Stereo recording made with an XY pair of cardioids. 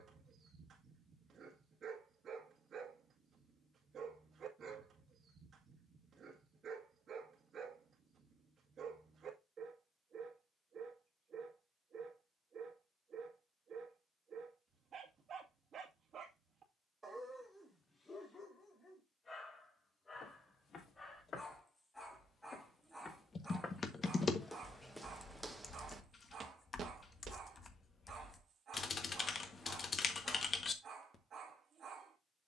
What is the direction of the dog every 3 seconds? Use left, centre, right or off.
right, right, right, right, right, right, left, centre, right, right, right.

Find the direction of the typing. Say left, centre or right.
left.